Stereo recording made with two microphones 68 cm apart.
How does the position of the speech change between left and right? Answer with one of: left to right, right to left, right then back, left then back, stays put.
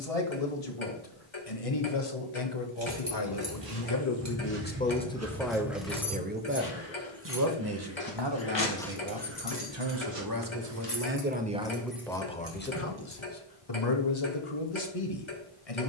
right then back.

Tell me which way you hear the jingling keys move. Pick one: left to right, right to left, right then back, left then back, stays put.
left then back.